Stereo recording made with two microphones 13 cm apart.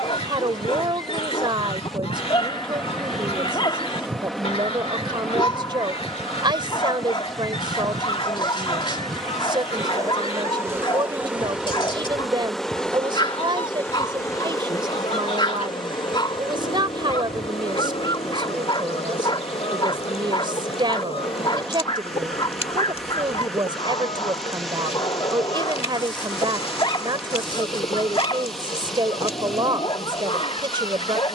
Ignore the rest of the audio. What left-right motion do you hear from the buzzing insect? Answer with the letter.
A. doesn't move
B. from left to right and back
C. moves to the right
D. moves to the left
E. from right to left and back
D.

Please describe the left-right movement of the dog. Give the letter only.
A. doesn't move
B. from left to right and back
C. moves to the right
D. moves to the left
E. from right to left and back
A.